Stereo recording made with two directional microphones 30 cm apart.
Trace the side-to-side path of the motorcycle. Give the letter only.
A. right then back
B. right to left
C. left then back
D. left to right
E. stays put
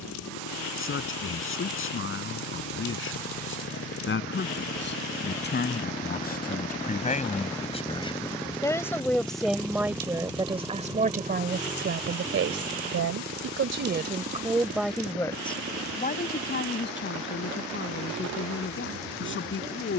D.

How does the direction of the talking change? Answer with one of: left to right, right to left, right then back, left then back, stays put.
right then back.